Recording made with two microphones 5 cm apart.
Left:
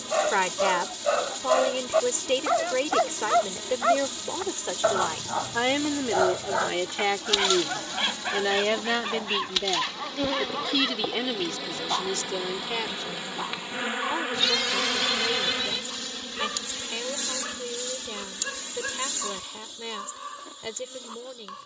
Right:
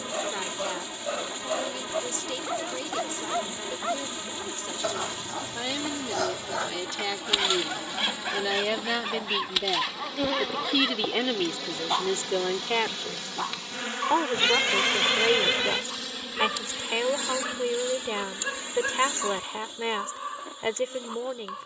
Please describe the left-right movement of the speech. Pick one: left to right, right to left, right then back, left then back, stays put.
left to right.